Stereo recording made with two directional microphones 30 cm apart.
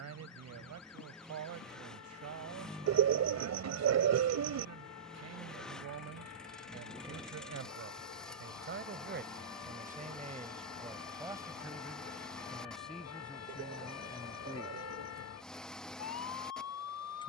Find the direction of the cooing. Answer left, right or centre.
right.